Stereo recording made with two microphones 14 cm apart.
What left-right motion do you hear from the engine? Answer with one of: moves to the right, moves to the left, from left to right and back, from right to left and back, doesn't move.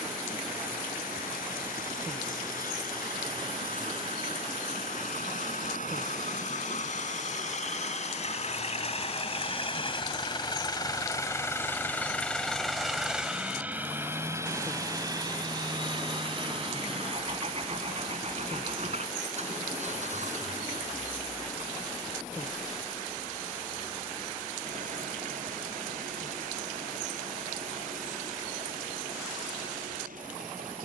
moves to the right.